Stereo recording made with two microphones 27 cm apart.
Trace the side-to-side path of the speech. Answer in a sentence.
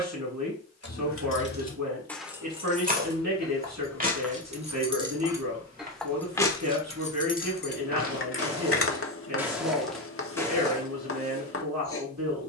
In this clip you hear the speech stay put.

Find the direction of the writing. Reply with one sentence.
In this clip you hear the writing on the left.